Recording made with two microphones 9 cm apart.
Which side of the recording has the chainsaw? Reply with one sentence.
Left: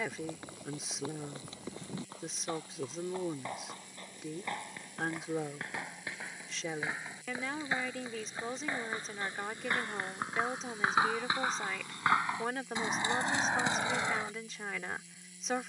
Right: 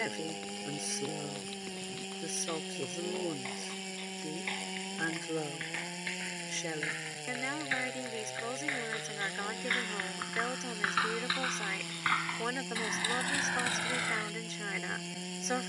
In this clip you hear the chainsaw on the right.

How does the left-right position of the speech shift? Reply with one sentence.
In this clip you hear the speech stay in one place.